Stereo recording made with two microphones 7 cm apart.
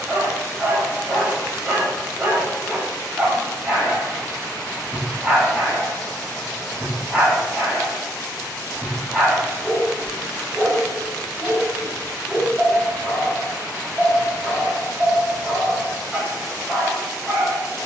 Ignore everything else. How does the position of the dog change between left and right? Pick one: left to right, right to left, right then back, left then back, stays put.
stays put.